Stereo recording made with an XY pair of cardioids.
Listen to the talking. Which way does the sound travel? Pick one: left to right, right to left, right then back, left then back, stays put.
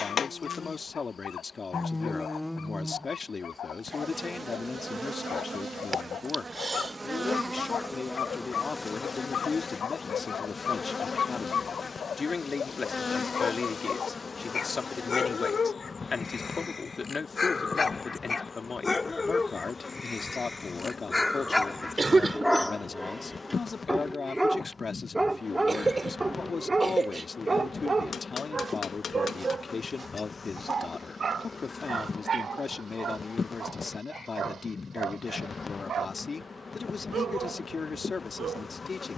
stays put.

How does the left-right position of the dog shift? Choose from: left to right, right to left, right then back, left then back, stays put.
left to right.